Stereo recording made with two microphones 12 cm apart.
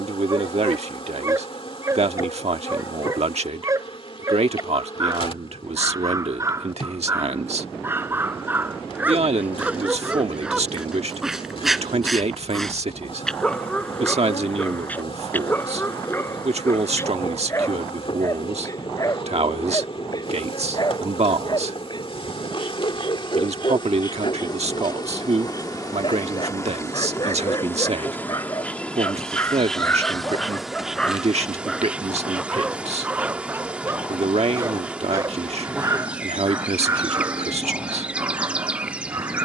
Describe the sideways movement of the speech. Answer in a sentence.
In this clip you hear the speech stay put.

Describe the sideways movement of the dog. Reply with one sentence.
In this clip you hear the dog move from right to left and back again.